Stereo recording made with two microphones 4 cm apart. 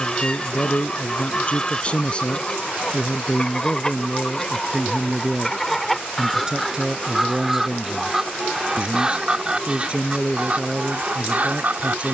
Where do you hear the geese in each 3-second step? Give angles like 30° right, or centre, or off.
20° left, 10° left, 10° right, 30° right.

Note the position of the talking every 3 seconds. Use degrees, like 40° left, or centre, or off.
30° left, centre, 20° right, 30° right.